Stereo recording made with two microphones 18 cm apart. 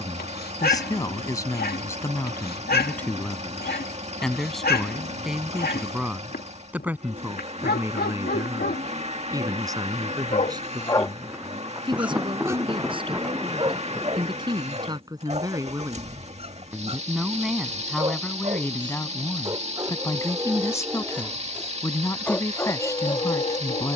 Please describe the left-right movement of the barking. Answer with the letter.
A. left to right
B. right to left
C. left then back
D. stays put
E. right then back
E.